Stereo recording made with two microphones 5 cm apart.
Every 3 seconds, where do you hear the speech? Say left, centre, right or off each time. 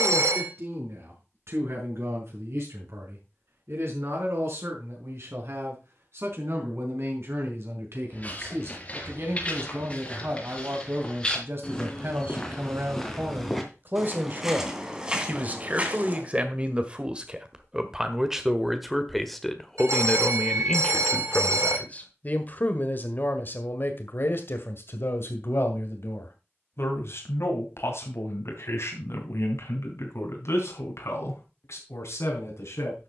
right, right, right, right, right, right, centre, left, left, left, left.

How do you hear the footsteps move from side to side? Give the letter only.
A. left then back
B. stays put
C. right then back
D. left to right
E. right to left
D.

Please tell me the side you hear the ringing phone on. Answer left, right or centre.
right.